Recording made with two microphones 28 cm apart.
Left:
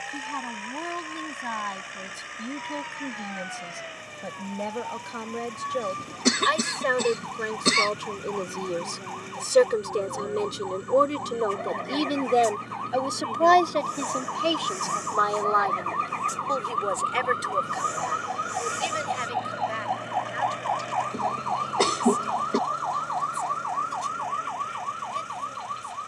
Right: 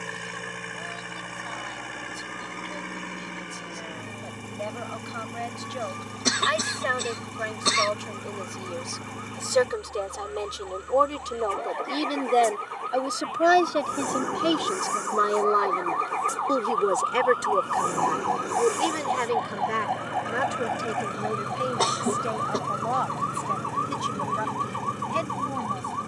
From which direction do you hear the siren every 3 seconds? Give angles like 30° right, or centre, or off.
70° left, 70° left, 60° left, 60° left, 50° left, 30° left, centre, 20° right, 40° right.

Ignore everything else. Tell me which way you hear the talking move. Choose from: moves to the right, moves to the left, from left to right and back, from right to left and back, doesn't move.
moves to the right.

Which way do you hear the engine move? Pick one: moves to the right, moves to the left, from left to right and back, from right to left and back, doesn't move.
doesn't move.